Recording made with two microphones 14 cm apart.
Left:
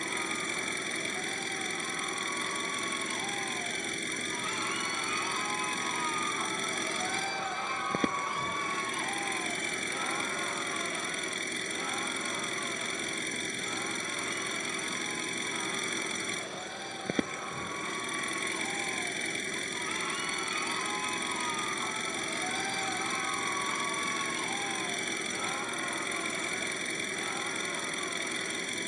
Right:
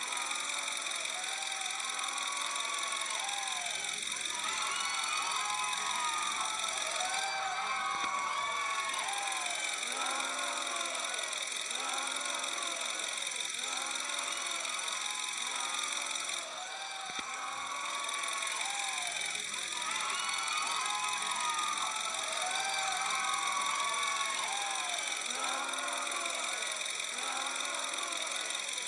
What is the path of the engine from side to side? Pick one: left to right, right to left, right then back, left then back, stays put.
stays put.